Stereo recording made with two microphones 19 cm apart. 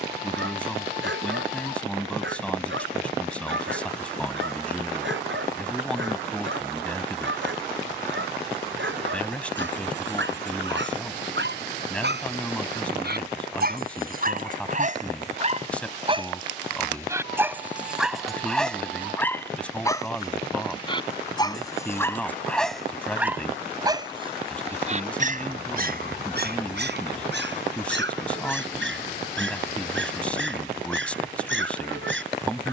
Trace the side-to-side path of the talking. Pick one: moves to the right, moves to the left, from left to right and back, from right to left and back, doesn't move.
doesn't move.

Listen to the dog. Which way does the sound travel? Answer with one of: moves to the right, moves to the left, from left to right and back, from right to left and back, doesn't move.
from right to left and back.